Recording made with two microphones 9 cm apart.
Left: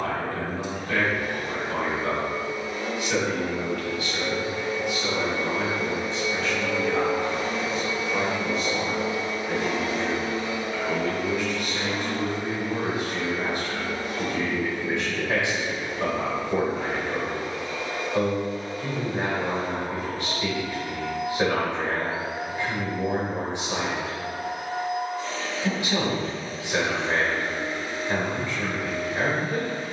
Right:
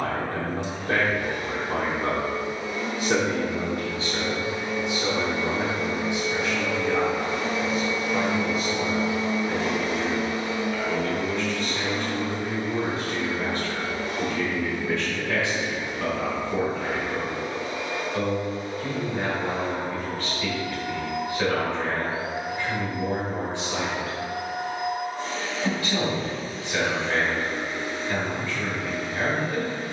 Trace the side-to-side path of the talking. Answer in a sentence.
You can hear the talking move from right to left.